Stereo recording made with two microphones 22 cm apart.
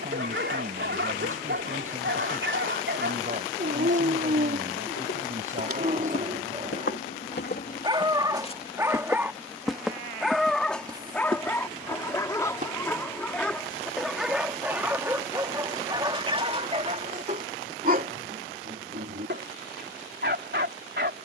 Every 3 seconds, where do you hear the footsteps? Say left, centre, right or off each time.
off, left, left, centre, right, off, off.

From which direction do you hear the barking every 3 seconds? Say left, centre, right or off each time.
right, right, right, centre, centre, right, right.